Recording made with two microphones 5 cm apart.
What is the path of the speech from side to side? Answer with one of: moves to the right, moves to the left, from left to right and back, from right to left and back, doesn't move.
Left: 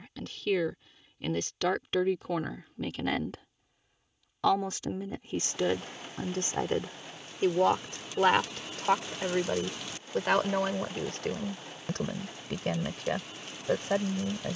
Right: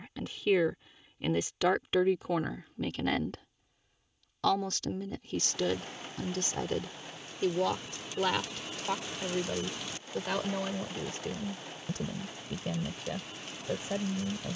moves to the left.